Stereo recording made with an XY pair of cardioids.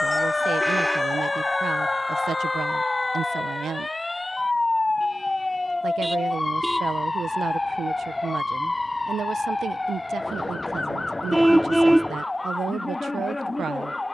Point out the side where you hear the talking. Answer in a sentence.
You can hear the talking on the right.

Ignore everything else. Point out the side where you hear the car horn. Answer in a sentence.
In this clip you hear the car horn in the centre.